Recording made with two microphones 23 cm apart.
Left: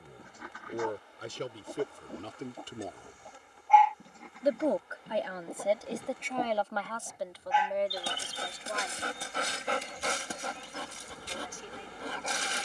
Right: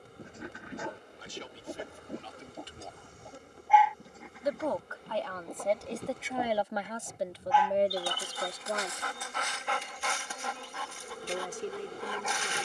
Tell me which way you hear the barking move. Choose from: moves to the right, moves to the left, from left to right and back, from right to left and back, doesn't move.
moves to the left.